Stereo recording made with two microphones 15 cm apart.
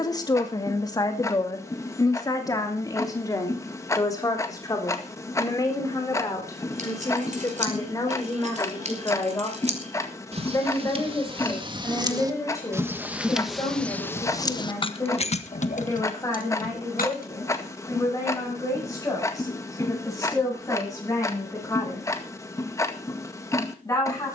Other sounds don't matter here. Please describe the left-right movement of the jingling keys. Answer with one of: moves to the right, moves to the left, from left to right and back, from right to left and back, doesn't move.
moves to the left.